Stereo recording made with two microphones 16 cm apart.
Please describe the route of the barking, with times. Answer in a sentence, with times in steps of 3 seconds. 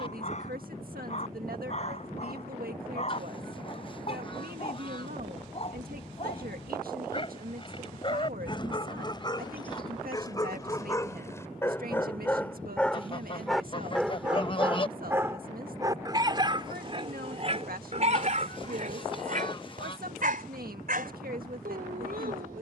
In this clip you hear the barking on the left from 0 s, in the centre from 12 s and on the right from 15 s.